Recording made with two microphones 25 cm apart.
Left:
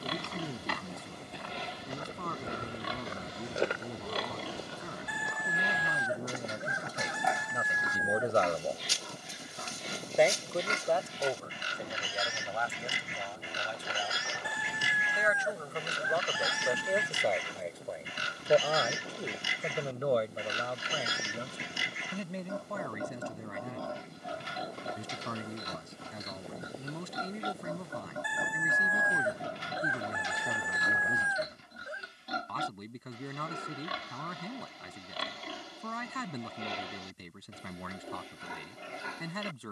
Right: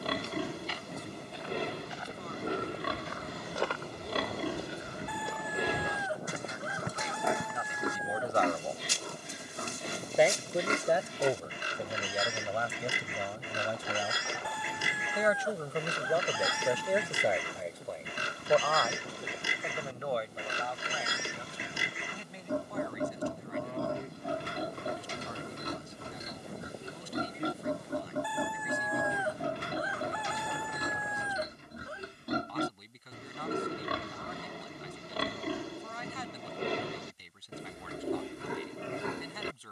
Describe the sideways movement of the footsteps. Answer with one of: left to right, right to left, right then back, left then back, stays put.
left to right.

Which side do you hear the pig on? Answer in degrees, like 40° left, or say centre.
60° right.